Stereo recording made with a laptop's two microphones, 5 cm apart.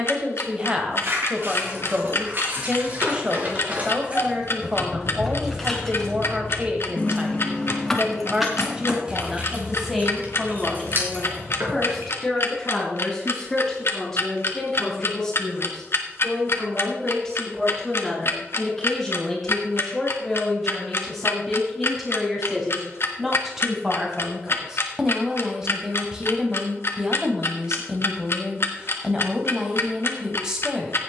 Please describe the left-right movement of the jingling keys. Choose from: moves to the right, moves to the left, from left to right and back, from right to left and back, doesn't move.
from right to left and back.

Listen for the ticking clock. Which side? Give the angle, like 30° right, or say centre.
60° left.